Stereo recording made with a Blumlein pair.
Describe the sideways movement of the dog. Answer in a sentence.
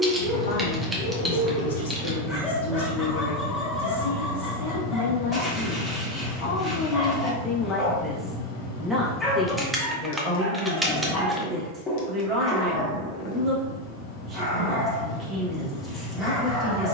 In this clip you hear the dog stay put.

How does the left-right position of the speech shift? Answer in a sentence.
In this clip you hear the speech go from the left side to the right.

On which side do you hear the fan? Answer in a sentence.
You can hear the fan on the left.